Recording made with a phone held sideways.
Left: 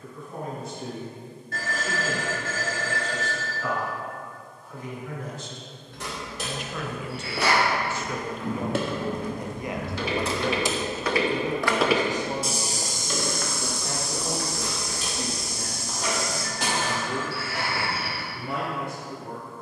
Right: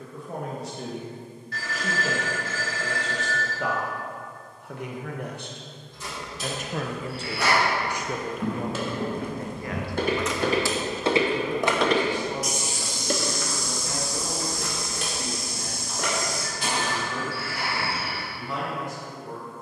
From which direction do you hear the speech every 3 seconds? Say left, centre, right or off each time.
right, right, right, left, left, left, left.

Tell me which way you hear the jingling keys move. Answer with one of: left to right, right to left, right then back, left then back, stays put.
left to right.